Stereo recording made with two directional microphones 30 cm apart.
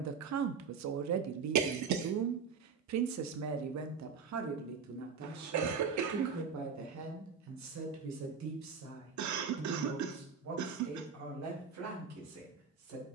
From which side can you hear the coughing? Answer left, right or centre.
right.